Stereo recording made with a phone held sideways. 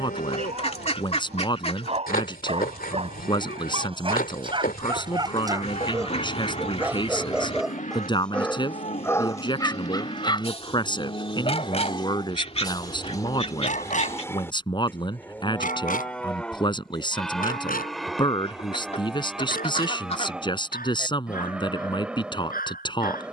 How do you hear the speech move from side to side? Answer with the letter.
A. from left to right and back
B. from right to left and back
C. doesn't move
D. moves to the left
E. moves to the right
C.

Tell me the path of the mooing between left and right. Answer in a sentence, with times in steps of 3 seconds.
You can hear the mooing on the left from 0 s and in the centre from 15 s.